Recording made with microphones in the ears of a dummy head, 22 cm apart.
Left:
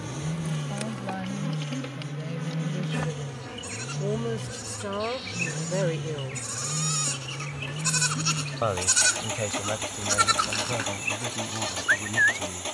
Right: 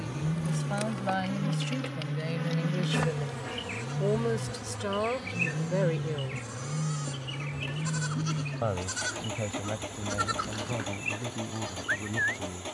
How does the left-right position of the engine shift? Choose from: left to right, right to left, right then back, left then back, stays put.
stays put.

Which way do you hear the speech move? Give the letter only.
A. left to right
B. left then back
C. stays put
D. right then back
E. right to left
E.